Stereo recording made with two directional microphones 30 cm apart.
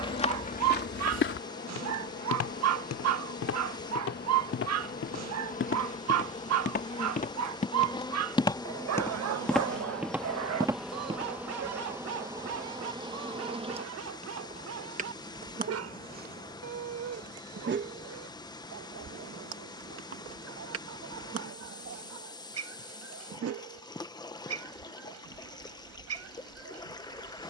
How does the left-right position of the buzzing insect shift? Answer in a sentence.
You can hear the buzzing insect travel towards the right.